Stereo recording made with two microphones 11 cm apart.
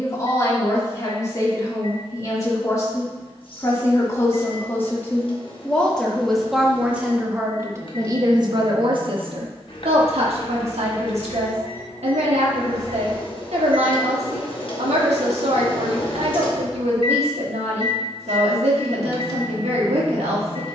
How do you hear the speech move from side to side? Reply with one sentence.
In this clip you hear the speech move to the right.